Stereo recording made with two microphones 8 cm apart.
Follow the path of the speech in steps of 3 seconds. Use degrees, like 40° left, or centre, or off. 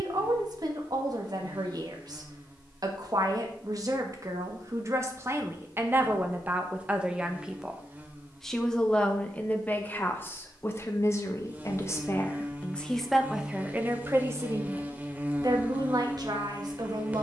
50° right, 40° right, 10° right, 30° left, 10° right, 50° right.